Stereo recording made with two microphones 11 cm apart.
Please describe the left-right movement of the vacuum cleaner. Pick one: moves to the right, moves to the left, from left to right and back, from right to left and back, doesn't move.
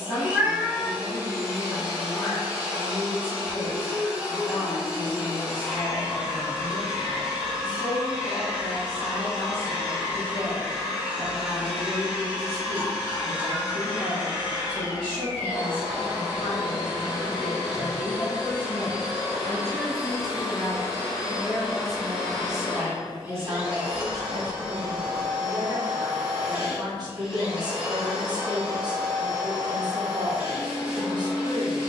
doesn't move.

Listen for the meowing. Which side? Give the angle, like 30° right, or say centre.
20° right.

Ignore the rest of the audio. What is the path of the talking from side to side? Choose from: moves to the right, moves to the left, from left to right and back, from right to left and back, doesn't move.
moves to the right.